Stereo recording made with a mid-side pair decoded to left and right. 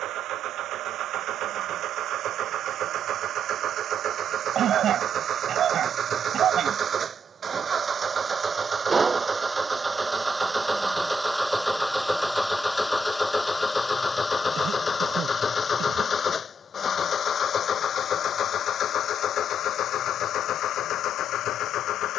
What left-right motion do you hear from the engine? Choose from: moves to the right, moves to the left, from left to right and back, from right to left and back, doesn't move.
moves to the left.